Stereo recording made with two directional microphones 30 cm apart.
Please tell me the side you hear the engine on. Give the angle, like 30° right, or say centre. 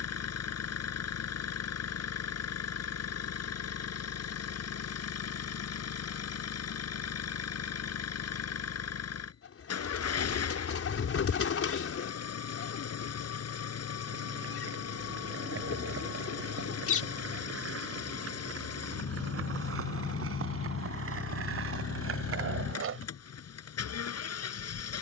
50° left.